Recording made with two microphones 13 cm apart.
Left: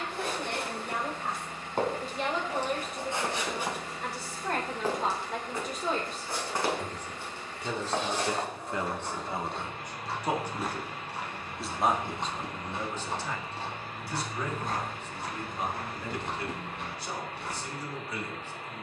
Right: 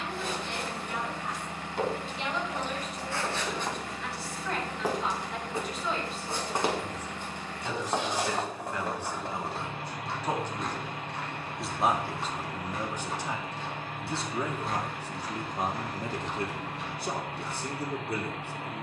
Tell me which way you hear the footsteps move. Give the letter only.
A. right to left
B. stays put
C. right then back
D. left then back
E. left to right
C.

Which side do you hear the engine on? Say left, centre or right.
right.